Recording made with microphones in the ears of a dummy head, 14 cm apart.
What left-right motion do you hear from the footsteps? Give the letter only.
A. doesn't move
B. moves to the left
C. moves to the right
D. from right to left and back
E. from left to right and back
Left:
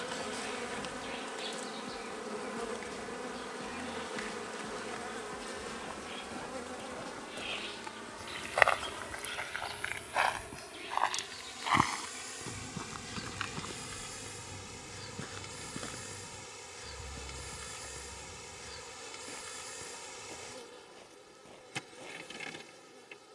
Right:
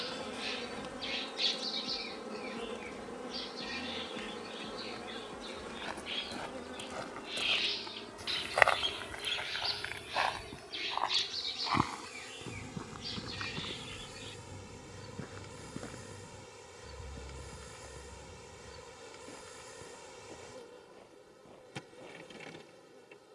B.